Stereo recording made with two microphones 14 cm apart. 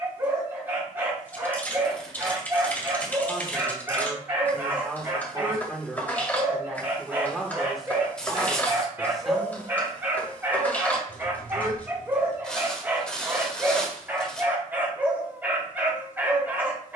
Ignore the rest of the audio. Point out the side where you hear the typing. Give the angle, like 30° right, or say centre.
10° left.